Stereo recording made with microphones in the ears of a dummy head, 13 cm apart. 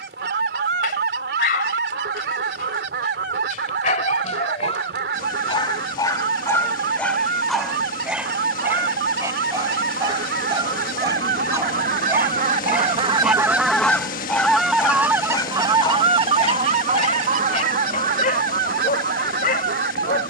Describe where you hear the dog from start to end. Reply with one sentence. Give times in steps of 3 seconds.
You can hear the dog on the left from 0 s, in the centre from 6 s, on the right from 9 s, in the centre from 12 s and on the left from 15 s.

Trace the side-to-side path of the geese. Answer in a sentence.
In this clip you hear the geese go left and come back.